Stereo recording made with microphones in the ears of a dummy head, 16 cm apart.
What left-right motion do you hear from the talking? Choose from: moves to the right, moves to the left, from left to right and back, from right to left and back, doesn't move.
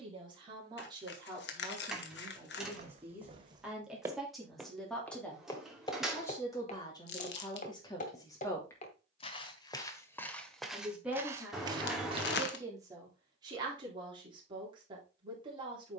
from right to left and back.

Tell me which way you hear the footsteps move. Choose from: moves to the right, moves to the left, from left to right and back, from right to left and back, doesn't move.
from right to left and back.